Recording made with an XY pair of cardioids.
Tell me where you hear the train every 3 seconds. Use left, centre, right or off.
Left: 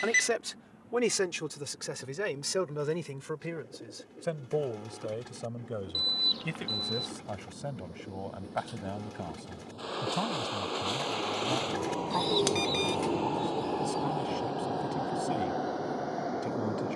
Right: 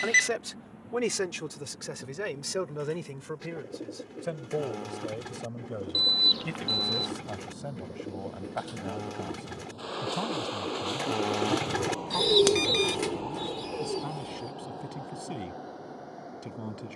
right, right, right, centre, left, left.